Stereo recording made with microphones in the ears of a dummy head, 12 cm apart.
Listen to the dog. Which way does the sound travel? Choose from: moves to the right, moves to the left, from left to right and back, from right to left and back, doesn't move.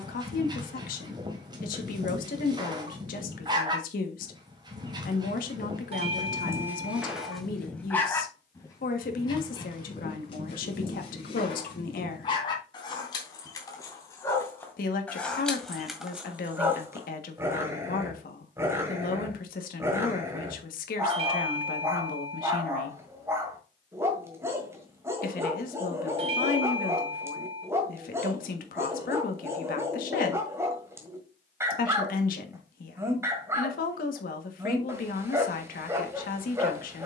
from right to left and back.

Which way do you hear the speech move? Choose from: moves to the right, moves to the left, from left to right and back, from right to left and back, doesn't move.
doesn't move.